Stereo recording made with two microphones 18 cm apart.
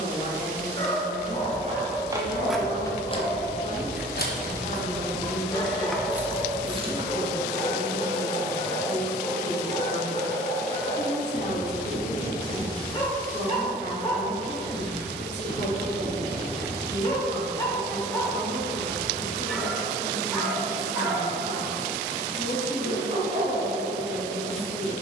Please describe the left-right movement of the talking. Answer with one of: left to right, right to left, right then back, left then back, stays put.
stays put.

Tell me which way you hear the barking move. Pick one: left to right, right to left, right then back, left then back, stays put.
left to right.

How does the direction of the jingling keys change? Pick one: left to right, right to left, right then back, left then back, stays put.
left then back.